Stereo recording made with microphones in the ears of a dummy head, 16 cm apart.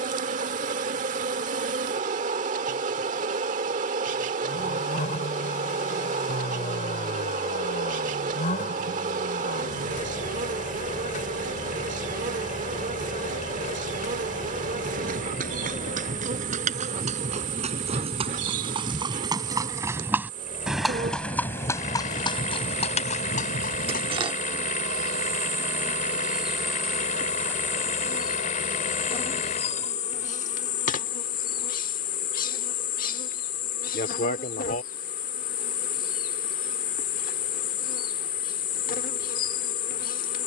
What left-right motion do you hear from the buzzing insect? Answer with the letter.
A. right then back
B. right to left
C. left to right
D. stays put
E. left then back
B.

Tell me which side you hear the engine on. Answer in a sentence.
In this clip you hear the engine on the left.